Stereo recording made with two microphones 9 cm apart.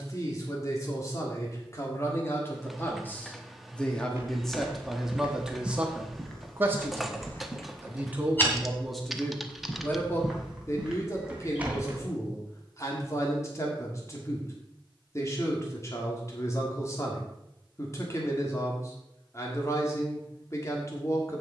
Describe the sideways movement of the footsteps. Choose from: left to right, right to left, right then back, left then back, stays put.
left then back.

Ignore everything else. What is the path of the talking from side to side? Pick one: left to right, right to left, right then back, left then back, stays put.
right then back.